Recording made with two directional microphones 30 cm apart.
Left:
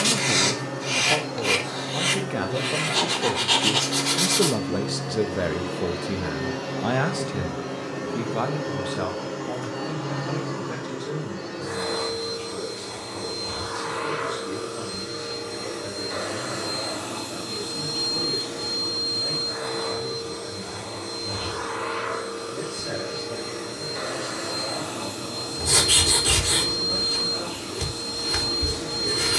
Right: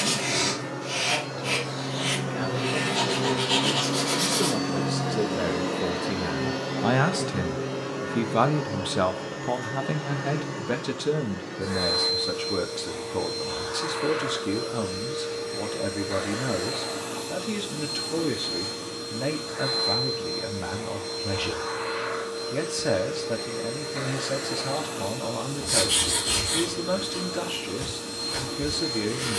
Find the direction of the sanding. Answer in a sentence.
You can hear the sanding on the left.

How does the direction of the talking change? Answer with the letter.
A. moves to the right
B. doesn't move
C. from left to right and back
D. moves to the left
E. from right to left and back
A.